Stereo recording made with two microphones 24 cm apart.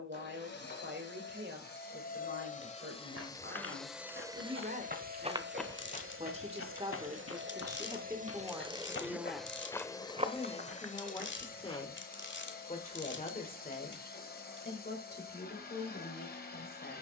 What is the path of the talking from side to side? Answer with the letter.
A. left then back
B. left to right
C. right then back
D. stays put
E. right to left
E.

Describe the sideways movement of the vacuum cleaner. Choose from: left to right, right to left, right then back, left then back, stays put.
right then back.